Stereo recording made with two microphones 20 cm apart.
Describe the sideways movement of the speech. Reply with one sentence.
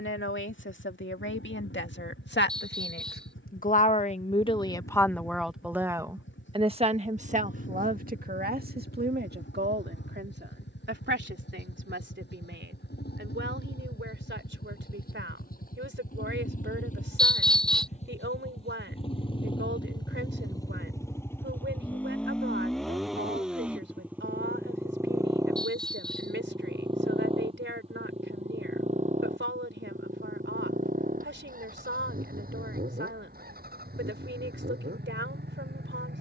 You can hear the speech move to the right.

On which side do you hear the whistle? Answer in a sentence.
You can hear the whistle in the centre.